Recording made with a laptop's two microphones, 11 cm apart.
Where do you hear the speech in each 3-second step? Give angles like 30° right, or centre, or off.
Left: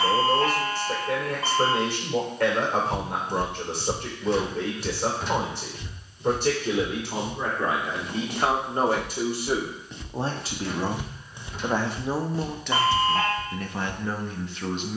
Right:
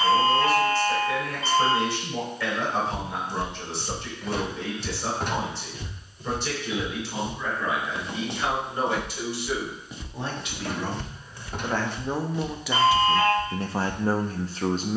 60° left, 60° left, 50° left, 30° left, 20° right.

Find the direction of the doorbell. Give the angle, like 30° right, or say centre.
60° left.